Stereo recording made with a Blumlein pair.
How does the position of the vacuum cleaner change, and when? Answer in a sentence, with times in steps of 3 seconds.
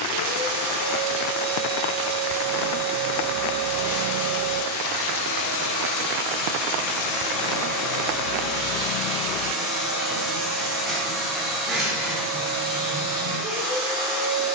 In this clip you hear the vacuum cleaner on the left from 0 s, in the centre from 9 s and on the right from 12 s.